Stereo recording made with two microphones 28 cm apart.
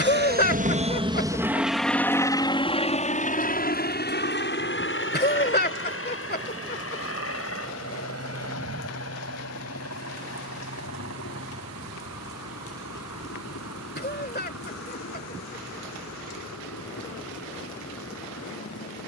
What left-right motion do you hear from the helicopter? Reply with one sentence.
You can hear the helicopter go from the right side to the left.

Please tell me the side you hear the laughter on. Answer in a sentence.
You can hear the laughter on the left.